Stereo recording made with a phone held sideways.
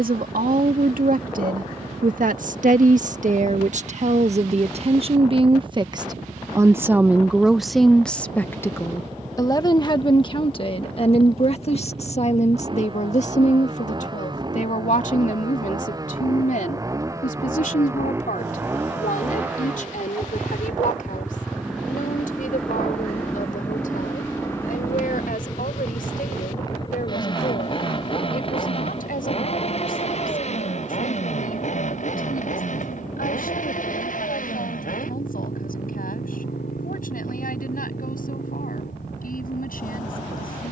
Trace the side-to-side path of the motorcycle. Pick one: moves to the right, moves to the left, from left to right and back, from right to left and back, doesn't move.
moves to the left.